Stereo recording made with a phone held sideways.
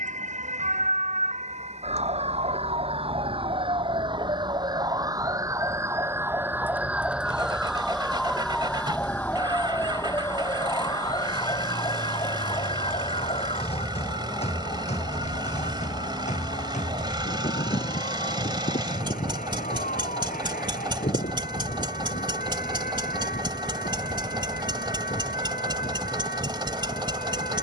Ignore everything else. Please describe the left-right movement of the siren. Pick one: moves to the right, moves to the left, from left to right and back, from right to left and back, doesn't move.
moves to the left.